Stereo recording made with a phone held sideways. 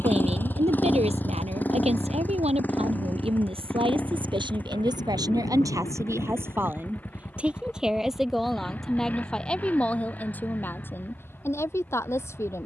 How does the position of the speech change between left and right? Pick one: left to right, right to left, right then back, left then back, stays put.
right to left.